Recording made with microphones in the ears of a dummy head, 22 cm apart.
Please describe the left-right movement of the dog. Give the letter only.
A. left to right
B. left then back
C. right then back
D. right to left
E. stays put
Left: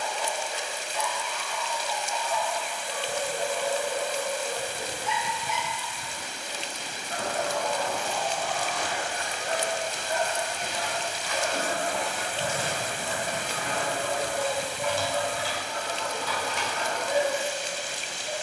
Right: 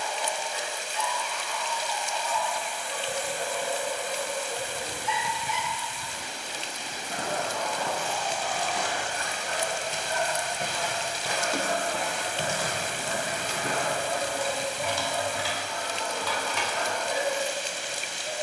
A.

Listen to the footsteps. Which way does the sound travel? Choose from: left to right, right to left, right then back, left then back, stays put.
right to left.